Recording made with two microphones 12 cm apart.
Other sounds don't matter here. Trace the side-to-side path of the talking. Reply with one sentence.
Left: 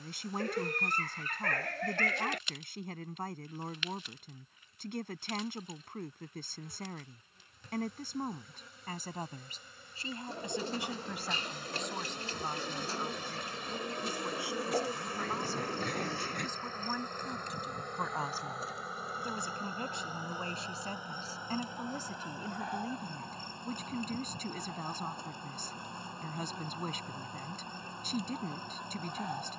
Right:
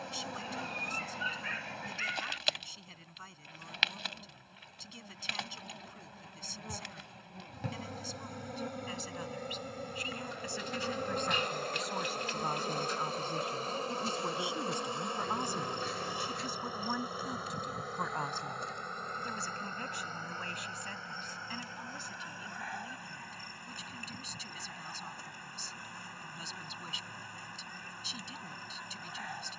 In this clip you hear the talking move from left to right and back again.